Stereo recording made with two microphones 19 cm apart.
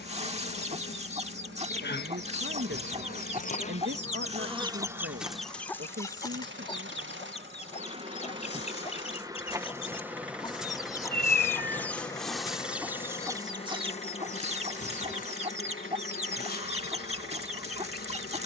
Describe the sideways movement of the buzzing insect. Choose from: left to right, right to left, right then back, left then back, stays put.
right then back.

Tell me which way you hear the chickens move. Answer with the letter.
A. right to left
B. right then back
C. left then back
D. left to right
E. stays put
C.